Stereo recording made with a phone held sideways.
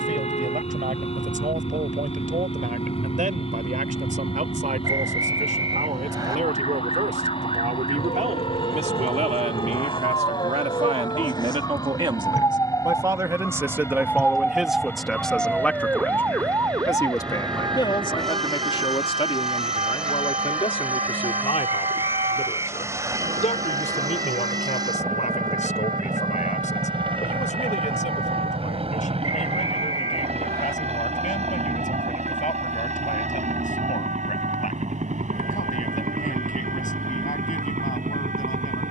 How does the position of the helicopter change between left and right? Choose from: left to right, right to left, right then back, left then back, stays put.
left to right.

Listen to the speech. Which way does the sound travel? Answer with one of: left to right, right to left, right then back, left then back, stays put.
right to left.